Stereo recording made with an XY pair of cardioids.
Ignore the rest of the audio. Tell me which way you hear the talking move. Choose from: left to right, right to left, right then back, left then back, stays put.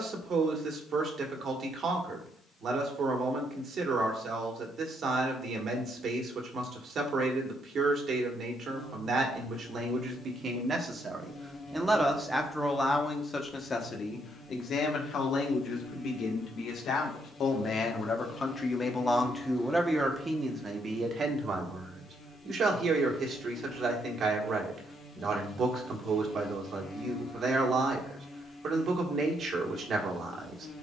left then back.